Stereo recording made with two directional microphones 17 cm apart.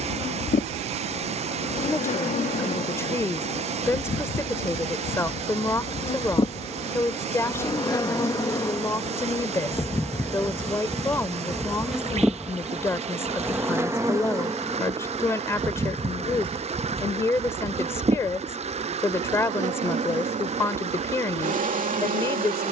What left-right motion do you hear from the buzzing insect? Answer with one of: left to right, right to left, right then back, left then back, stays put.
left to right.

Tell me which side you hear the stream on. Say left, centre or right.
right.